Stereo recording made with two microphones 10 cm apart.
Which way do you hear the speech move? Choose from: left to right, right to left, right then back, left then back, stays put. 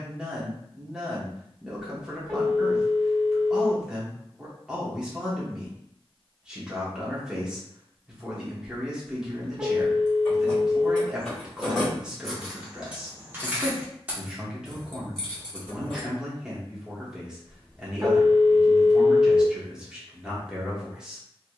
stays put.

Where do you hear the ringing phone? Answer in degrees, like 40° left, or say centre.
20° right.